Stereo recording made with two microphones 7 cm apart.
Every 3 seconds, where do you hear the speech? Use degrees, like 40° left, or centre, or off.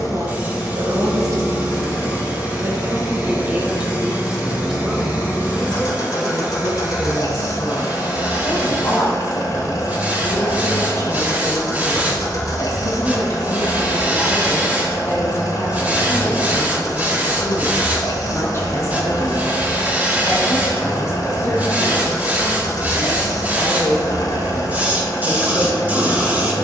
50° right, 10° right, 30° left, 40° left, 40° left, 40° left, 40° left, 40° left, 40° left.